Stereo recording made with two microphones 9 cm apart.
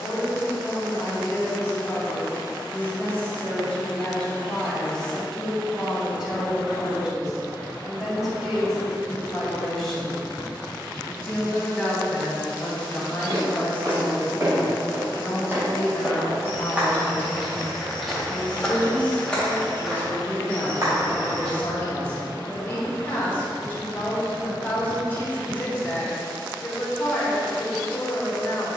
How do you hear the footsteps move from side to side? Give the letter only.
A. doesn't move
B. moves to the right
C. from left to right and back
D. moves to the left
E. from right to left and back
E.